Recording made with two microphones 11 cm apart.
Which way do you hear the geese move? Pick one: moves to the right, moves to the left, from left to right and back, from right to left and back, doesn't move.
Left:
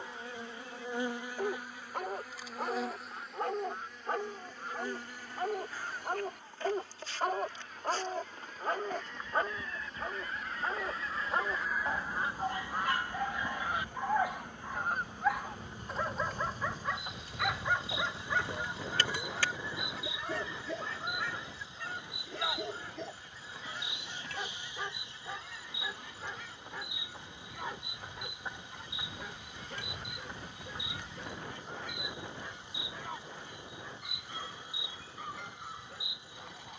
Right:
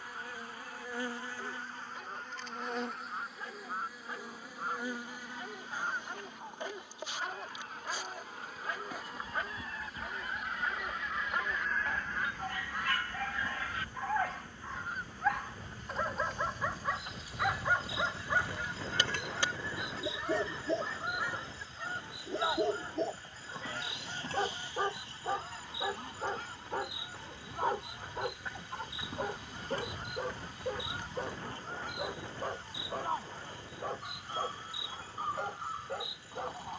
from right to left and back.